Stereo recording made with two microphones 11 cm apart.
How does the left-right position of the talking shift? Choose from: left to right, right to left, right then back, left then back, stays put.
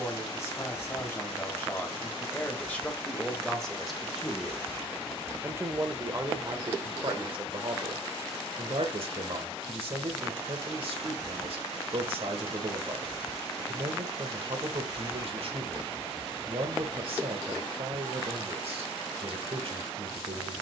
left to right.